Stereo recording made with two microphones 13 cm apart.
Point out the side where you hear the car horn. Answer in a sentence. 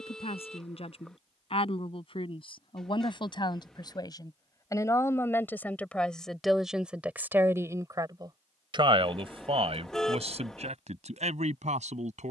In this clip you hear the car horn in the centre.